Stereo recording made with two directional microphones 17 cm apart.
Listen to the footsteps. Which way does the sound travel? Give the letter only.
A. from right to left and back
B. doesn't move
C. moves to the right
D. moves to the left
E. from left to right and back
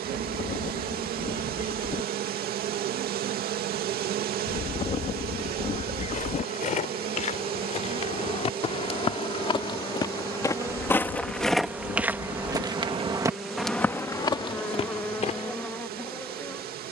E.